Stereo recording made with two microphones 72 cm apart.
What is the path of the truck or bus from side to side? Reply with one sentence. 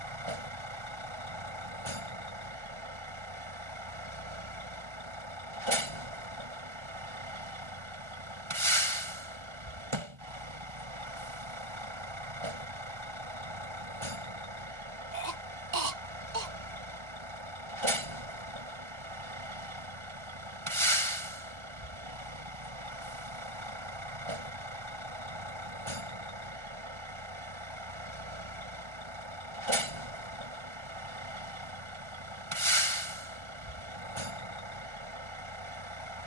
In this clip you hear the truck or bus stay put.